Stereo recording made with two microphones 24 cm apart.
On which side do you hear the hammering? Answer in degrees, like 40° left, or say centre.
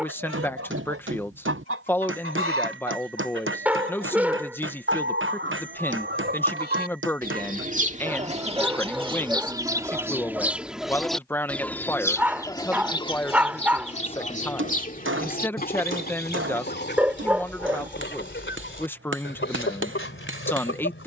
60° right.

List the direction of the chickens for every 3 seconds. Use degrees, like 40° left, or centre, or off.
60° right, 50° right, 30° right, 10° right, 20° left, 40° left, 50° left.